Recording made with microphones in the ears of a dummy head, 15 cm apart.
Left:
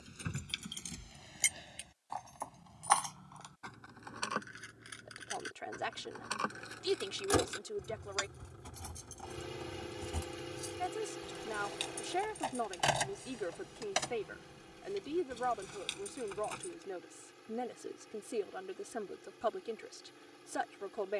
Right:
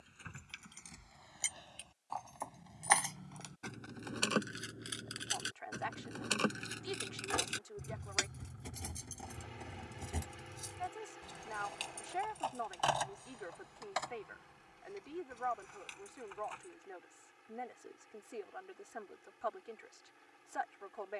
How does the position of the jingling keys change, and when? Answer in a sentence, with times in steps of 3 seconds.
In this clip you hear the jingling keys on the left from 0 s, on the right from 3 s, in the centre from 9 s, on the left from 12 s and not at all from 18 s.